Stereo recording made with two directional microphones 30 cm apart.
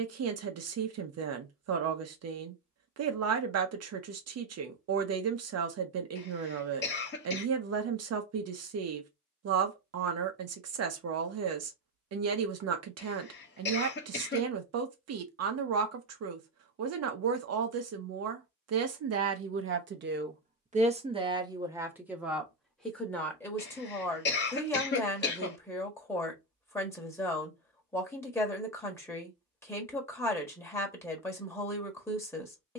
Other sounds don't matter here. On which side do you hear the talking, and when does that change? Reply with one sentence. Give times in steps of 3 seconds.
In this clip you hear the talking on the right from 0 s and in the centre from 21 s.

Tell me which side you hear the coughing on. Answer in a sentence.
In this clip you hear the coughing on the left.